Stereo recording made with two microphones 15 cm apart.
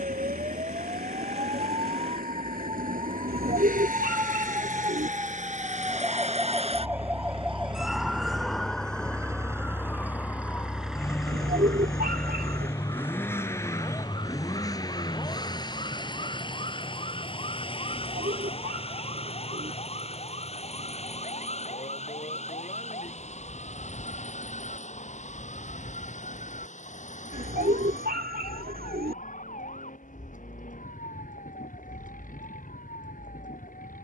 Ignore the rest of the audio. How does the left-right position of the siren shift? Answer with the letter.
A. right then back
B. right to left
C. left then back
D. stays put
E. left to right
B.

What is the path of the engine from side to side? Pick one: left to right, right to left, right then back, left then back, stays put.
right to left.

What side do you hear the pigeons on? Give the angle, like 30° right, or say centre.
80° right.